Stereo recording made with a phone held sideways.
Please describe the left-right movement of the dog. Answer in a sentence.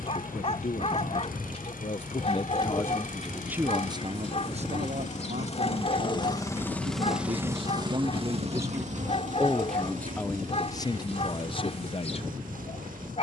In this clip you hear the dog stay put.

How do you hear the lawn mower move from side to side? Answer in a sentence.
In this clip you hear the lawn mower go from the left side to the right.